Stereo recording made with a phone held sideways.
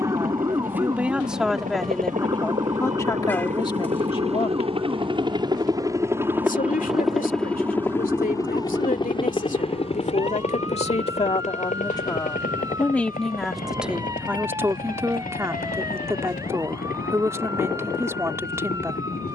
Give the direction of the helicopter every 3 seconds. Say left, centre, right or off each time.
right, right, centre, left, left, left, left.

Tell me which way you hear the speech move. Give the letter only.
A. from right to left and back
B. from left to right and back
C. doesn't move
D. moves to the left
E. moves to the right
A.